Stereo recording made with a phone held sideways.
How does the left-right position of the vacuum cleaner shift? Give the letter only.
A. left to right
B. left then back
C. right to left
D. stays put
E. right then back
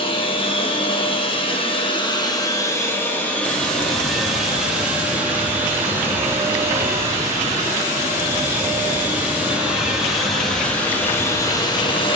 E.